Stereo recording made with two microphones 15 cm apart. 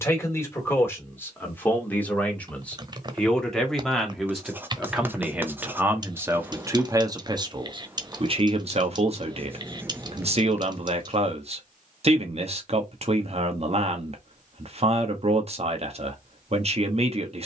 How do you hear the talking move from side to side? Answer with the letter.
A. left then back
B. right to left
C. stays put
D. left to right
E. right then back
D.